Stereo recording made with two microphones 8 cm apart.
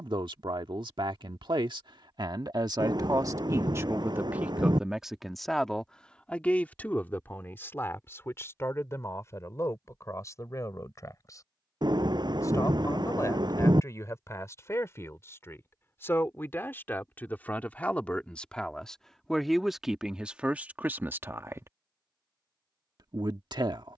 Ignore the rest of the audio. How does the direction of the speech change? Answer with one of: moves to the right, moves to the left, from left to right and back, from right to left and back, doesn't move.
from right to left and back.